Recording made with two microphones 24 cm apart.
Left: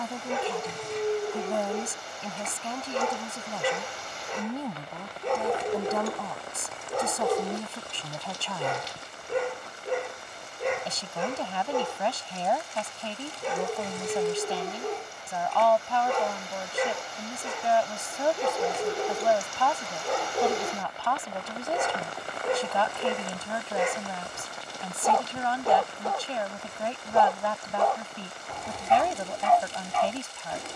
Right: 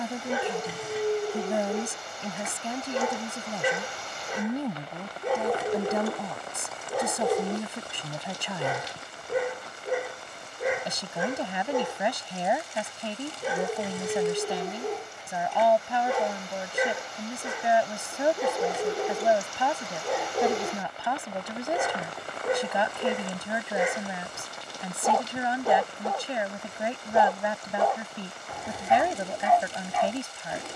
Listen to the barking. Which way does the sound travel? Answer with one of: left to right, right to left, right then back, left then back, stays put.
stays put.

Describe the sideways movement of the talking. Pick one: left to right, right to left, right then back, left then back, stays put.
stays put.